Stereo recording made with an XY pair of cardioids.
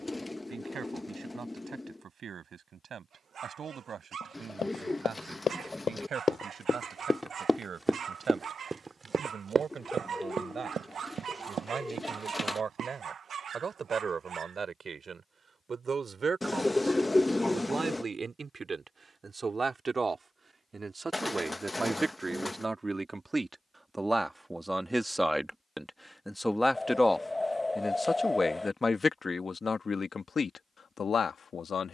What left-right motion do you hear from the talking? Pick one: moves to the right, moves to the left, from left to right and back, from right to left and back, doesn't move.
moves to the left.